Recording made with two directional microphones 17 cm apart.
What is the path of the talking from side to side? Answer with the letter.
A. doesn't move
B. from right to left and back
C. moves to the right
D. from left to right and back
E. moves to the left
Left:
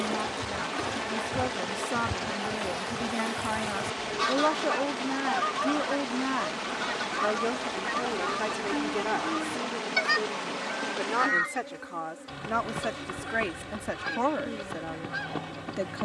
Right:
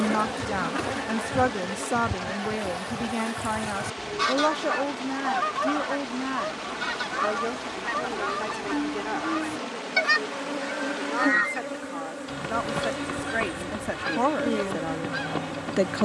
B.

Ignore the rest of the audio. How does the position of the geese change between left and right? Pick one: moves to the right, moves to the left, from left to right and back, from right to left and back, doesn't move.
doesn't move.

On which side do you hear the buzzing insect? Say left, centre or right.
right.